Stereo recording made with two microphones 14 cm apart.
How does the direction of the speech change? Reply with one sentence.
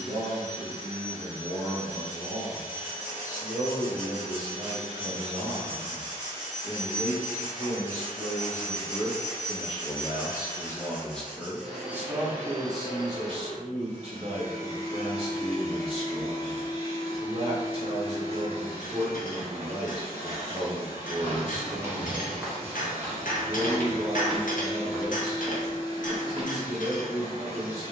In this clip you hear the speech go left and come back.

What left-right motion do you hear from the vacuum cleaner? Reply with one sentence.
In this clip you hear the vacuum cleaner move from right to left and back again.